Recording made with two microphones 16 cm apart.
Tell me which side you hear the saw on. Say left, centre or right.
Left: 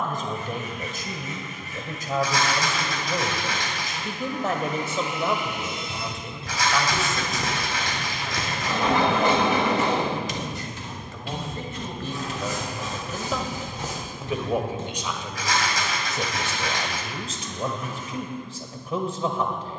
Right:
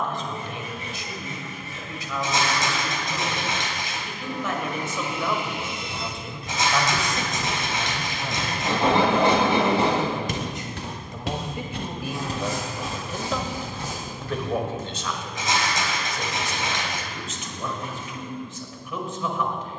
right.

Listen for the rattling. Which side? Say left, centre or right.
right.